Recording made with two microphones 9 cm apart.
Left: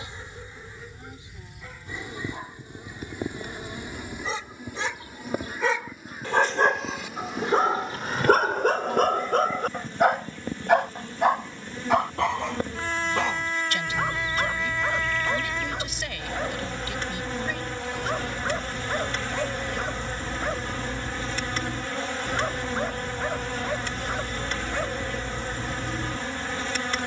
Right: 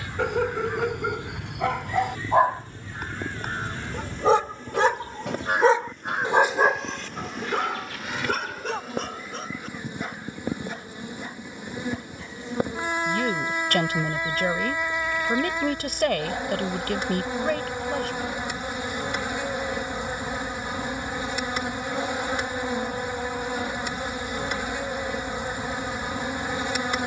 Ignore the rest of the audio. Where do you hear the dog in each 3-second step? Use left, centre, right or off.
right, right, left, left, left, left, left, left, left.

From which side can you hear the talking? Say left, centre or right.
right.